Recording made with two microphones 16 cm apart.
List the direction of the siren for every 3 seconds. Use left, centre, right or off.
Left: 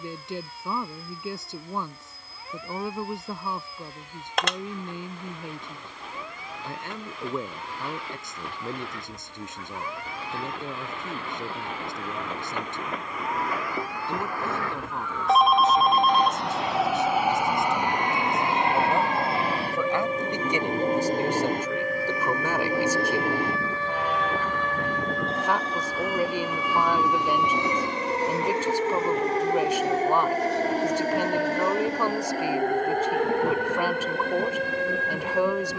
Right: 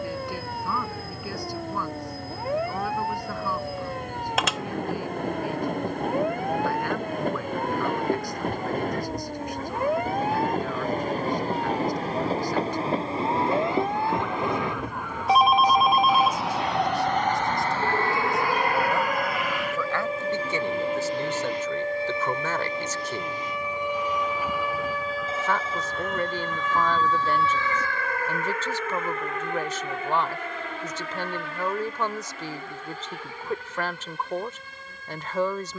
right, right, right, right, right, right, right, right, centre, left, left, left.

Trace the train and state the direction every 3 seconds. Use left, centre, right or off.
right, right, right, right, right, centre, left, left, left, left, left, left.